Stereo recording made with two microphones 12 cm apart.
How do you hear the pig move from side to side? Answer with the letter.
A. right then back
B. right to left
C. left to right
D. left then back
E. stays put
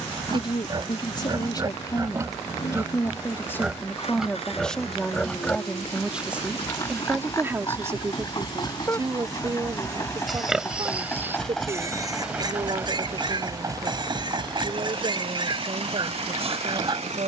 D.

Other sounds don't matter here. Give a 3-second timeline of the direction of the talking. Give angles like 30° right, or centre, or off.
30° left, 10° left, 20° right, 40° right, 50° right, 60° right.